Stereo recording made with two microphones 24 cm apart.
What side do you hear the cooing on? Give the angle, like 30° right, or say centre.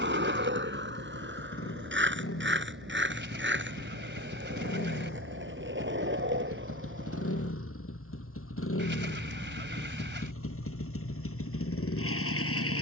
50° right.